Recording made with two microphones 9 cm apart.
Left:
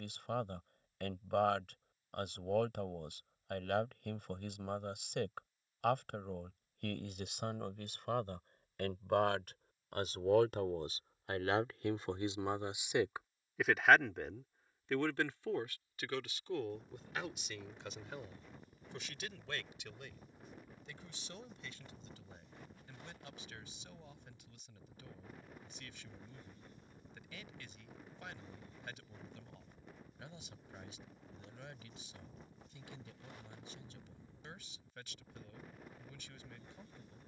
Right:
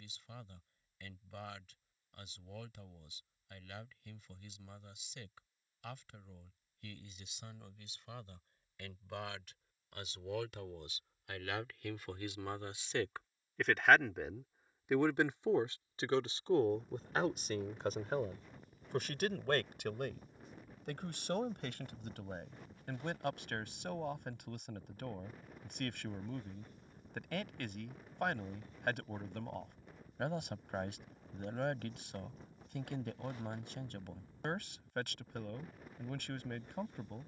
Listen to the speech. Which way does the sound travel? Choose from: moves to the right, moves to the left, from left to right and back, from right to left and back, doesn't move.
moves to the right.